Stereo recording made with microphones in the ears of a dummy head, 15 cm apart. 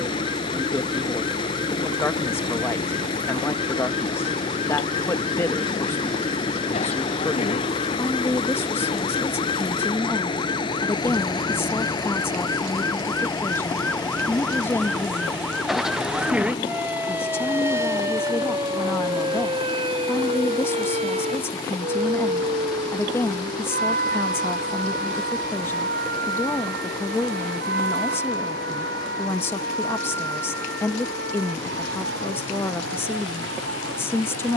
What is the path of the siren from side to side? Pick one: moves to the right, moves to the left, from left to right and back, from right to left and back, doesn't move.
moves to the right.